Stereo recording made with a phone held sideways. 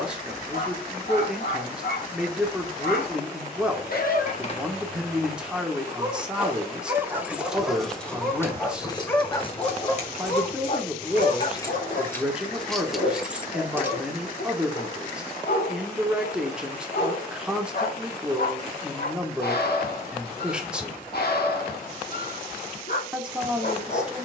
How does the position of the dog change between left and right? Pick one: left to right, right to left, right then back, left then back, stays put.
right then back.